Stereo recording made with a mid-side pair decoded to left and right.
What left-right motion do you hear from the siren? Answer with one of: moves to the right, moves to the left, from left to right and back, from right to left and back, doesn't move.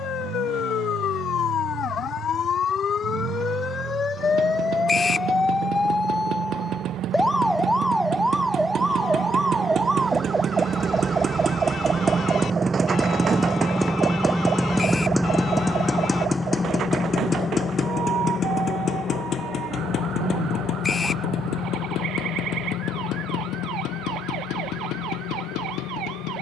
moves to the right.